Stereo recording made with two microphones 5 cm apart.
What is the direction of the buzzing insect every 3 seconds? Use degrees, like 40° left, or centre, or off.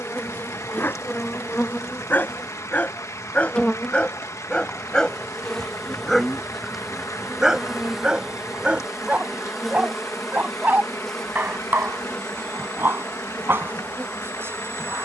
30° left, 20° left, centre, 10° left, 20° left.